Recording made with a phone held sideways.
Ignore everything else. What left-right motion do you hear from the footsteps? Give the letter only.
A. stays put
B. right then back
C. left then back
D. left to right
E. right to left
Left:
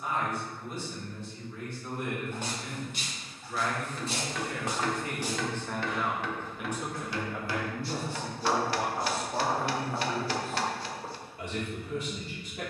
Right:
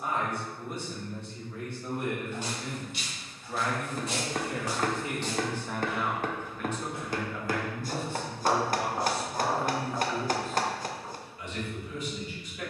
B.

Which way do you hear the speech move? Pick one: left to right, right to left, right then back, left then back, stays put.
right to left.